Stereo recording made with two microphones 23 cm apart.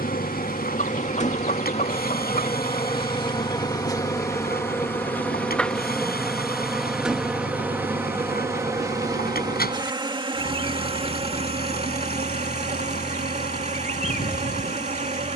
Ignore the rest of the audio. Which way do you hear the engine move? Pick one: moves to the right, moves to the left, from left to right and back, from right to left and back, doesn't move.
doesn't move.